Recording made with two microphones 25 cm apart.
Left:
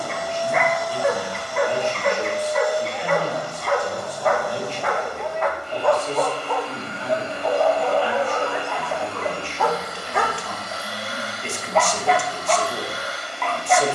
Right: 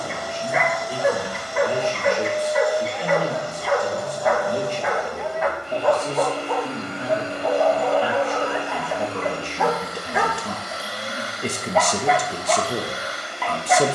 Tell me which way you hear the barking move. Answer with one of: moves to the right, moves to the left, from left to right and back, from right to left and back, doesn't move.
doesn't move.